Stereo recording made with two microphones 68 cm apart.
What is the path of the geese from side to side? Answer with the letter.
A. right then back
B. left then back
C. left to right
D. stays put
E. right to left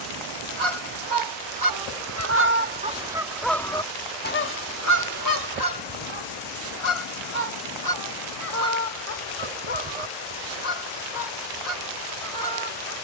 E.